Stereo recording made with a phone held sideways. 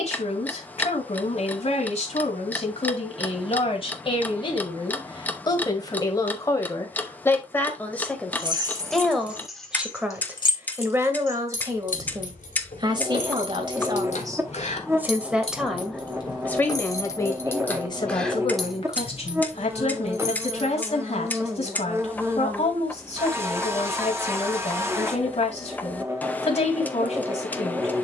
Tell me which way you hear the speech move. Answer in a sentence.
You can hear the speech move from left to right and back again.